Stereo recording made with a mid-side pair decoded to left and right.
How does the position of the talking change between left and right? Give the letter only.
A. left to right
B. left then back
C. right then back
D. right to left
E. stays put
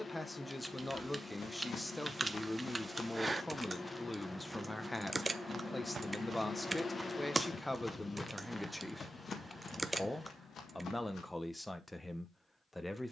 E.